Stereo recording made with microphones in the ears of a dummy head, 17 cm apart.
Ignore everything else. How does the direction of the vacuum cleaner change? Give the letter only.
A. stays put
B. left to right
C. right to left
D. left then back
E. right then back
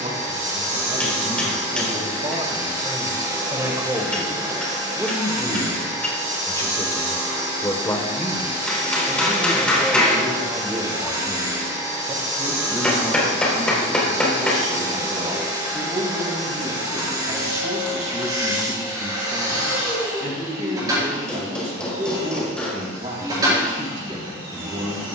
A.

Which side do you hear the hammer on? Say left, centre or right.
centre.